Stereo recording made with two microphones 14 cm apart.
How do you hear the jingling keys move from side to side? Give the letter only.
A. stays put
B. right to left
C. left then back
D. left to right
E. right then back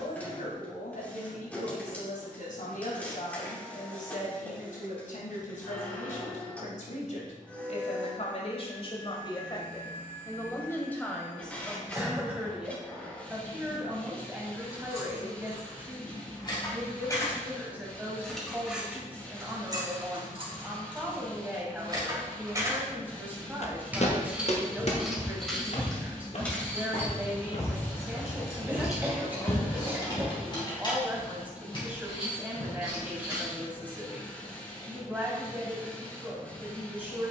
E.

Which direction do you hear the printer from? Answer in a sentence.
In this clip you hear the printer in the centre.